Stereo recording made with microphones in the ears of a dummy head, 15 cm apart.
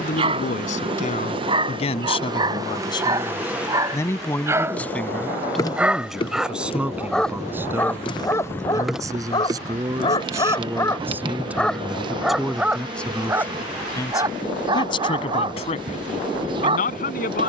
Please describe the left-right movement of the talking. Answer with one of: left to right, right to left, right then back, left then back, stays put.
right then back.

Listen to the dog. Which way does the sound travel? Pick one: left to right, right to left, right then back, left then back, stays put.
left then back.